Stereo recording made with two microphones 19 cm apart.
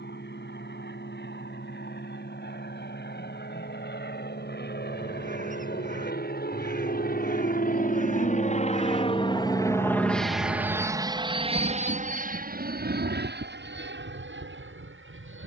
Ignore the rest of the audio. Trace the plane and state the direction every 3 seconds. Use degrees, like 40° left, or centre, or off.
80° left, 70° left, 50° left, centre, 50° right.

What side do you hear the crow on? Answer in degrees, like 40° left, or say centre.
40° right.